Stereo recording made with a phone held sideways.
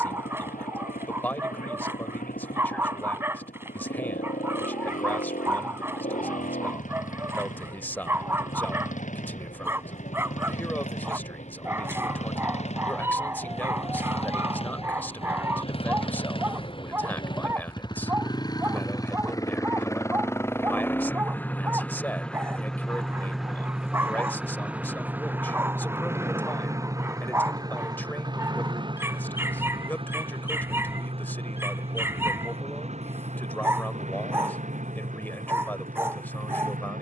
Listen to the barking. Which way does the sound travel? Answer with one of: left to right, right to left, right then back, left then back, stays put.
stays put.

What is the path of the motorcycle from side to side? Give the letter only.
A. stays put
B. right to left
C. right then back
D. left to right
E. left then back
D.